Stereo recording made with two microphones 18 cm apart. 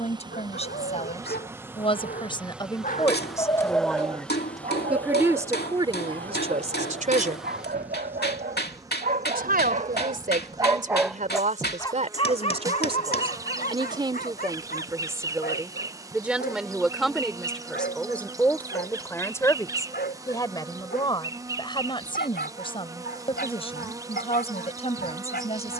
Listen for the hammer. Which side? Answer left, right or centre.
left.